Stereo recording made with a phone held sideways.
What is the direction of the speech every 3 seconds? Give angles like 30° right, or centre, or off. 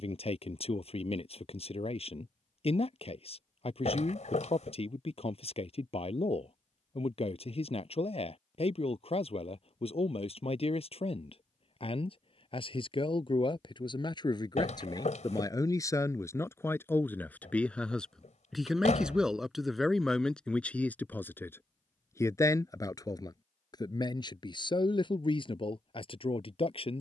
50° left, 50° left, 50° left, 50° left, 40° left, 20° left, centre, 20° left, 40° left.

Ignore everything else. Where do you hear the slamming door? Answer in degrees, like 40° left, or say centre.
60° left.